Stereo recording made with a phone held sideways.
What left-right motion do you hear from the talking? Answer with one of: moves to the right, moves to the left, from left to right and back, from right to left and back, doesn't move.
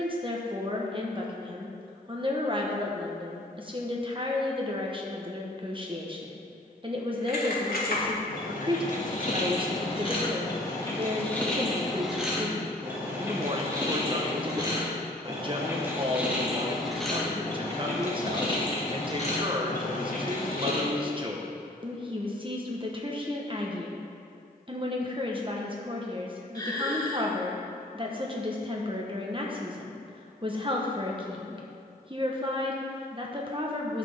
doesn't move.